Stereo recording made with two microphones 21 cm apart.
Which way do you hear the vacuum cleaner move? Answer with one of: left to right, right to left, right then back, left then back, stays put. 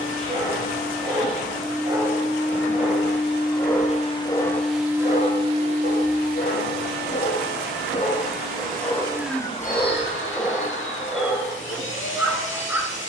right then back.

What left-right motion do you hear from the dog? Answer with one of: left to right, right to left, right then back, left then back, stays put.
left then back.